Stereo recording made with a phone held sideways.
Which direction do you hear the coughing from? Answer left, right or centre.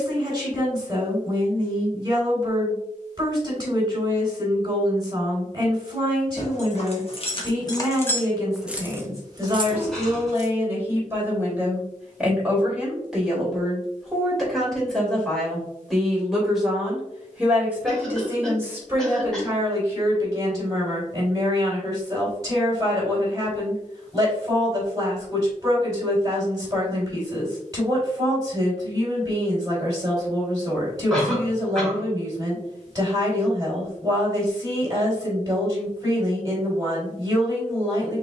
centre.